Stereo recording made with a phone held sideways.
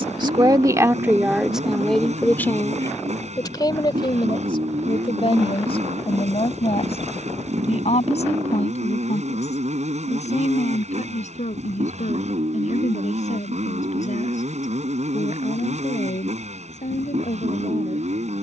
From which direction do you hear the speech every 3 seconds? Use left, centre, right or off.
centre, left, left, left, left, left.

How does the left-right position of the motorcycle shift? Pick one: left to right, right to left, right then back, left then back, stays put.
stays put.